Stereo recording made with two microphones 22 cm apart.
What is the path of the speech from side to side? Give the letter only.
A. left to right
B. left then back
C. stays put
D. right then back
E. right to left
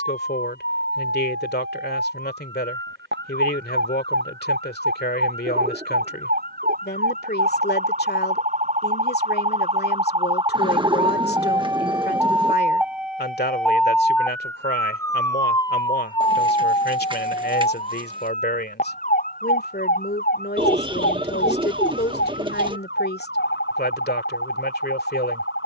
C.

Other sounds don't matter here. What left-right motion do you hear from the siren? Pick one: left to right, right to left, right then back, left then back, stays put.
right to left.